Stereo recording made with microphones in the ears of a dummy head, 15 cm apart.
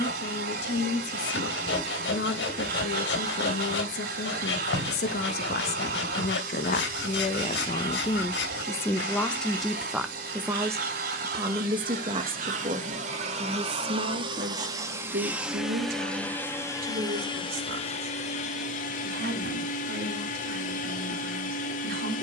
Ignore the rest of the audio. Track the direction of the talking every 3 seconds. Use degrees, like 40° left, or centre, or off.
70° left, 70° left, 40° left, 10° right, 40° right, 50° right, 60° right, 60° right.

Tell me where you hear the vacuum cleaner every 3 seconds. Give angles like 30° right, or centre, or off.
60° right, 60° right, 60° right, 60° right, 40° right, 10° left, 50° left, 50° left.